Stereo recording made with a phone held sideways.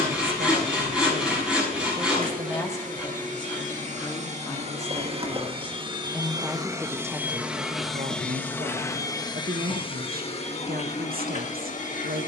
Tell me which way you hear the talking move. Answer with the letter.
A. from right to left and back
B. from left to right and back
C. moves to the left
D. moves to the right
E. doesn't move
A.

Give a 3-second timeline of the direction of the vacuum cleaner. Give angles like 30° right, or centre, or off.
60° right, 40° right, 10° right, 40° left.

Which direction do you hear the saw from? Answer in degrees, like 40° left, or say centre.
10° right.